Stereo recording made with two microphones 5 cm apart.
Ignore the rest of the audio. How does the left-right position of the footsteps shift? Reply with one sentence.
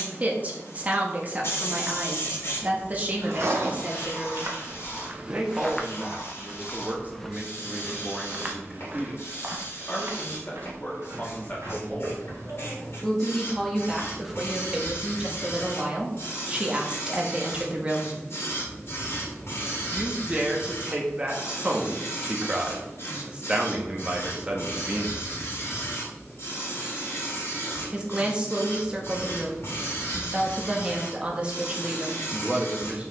You can hear the footsteps move from right to left and back again.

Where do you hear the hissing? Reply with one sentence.
In this clip you hear the hissing on the left.